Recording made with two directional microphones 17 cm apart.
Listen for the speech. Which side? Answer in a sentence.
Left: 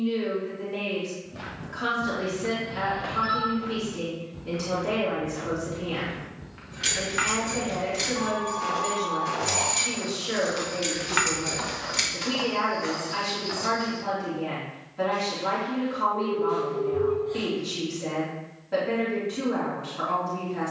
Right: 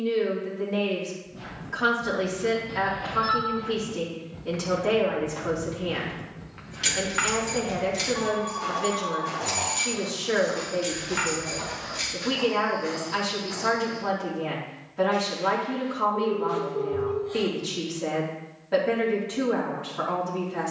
In this clip you hear the speech on the right.